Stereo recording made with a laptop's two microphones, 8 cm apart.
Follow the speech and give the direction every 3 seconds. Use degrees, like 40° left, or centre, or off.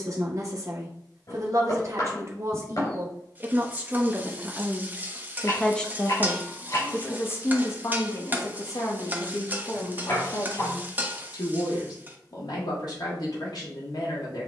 40° right, 10° right, 40° left, 60° left, 60° left.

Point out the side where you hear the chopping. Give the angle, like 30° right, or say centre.
50° left.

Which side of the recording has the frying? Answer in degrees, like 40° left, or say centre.
20° right.